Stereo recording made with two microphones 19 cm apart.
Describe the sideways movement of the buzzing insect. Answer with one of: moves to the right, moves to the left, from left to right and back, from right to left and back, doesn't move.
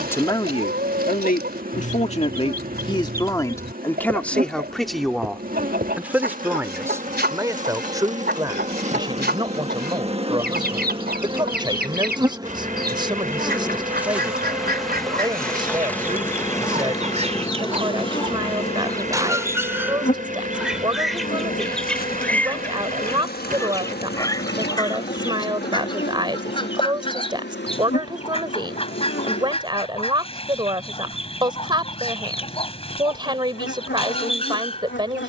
moves to the left.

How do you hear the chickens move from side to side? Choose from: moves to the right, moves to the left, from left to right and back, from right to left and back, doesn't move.
moves to the left.